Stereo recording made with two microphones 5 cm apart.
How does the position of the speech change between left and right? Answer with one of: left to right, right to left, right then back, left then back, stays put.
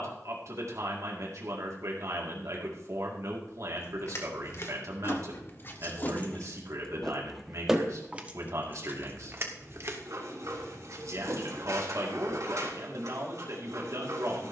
stays put.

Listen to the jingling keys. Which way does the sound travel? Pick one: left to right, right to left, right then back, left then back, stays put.
left to right.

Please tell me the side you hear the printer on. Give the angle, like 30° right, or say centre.
70° right.